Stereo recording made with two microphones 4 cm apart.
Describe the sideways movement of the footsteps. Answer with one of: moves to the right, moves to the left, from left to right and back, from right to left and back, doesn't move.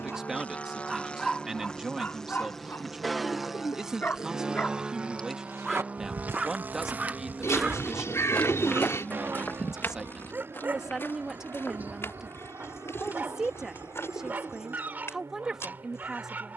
moves to the left.